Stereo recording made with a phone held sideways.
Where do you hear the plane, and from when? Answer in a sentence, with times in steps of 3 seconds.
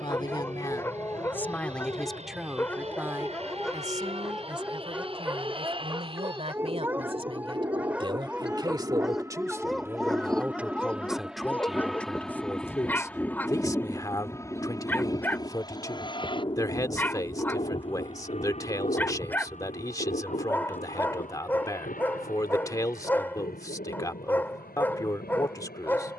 In this clip you hear the plane on the right from 0 s, in the centre from 9 s and on the left from 15 s.